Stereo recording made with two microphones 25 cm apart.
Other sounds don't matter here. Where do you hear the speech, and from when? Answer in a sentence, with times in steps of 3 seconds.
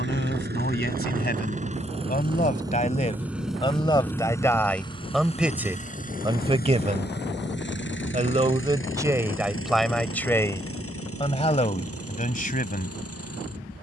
In this clip you hear the speech on the left from 0 s, in the centre from 3 s, on the right from 6 s, in the centre from 9 s and on the left from 12 s.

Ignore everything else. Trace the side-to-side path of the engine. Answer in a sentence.
You can hear the engine move to the left.